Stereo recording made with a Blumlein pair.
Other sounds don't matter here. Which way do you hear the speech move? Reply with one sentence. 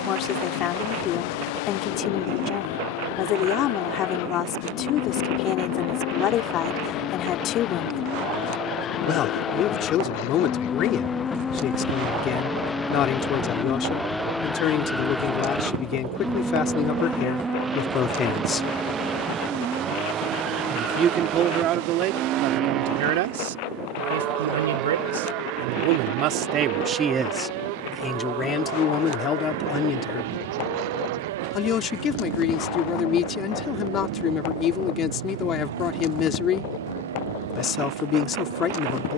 You can hear the speech go right and come back.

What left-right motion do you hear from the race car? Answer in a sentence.
You can hear the race car travel towards the right.